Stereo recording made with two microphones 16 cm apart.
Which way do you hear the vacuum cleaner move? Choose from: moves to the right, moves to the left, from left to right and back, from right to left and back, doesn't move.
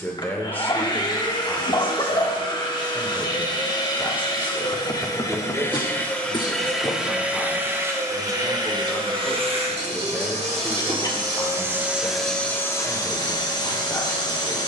from left to right and back.